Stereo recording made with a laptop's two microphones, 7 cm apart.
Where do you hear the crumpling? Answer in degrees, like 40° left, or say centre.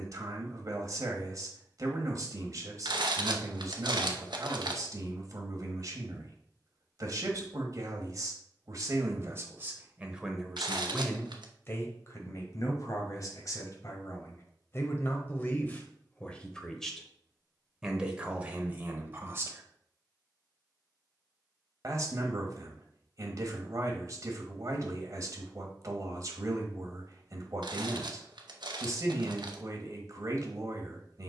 80° right.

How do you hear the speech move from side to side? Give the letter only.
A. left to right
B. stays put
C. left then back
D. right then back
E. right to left
C.